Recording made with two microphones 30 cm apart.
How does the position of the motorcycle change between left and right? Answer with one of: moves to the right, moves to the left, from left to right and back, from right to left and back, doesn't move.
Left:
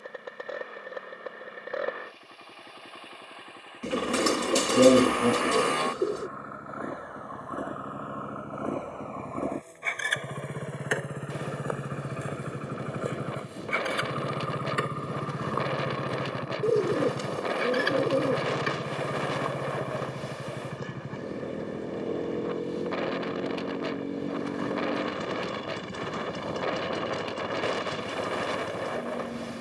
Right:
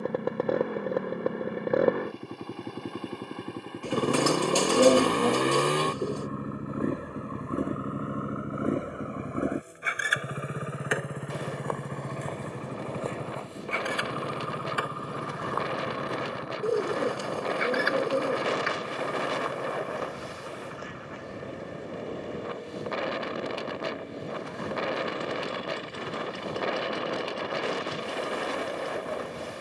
moves to the left.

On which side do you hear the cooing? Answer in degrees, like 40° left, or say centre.
20° left.